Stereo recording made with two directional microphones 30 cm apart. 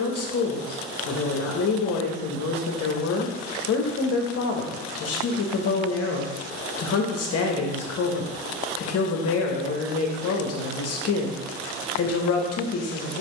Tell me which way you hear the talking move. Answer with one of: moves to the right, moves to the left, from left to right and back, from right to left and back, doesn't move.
doesn't move.